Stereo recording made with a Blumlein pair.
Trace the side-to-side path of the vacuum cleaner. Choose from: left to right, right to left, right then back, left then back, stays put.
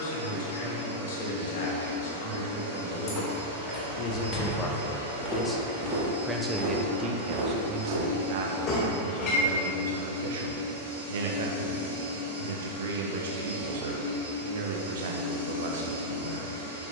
stays put.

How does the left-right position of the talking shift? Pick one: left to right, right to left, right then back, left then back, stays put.
left to right.